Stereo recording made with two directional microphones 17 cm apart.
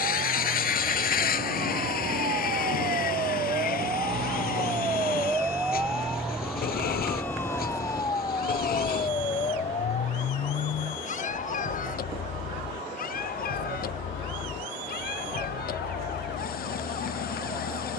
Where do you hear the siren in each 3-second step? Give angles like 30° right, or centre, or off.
50° right, 20° right, 10° left, 40° left, 60° left, 60° left.